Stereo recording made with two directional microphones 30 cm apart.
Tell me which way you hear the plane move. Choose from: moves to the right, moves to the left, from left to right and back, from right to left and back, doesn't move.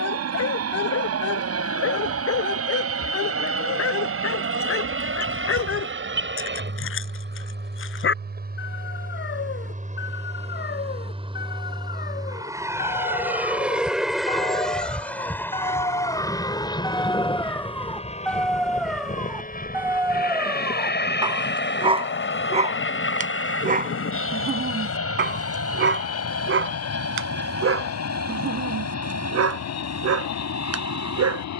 moves to the left.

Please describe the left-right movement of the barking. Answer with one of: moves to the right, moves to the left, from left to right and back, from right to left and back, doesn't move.
moves to the right.